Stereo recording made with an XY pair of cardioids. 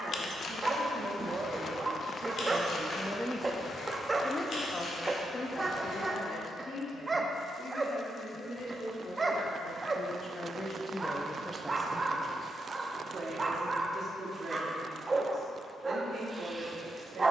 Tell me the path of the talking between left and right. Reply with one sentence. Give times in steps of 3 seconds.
You can hear the talking on the right from 0 s, on the left from 3 s and on the right from 12 s.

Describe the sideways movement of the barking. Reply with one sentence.
You can hear the barking stay in one place.